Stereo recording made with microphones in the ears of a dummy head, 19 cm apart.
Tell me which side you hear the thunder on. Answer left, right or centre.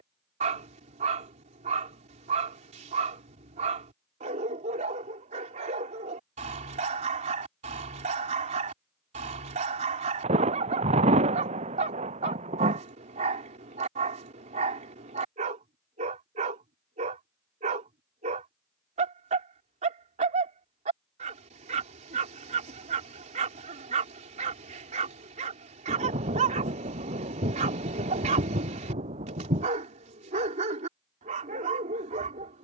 right.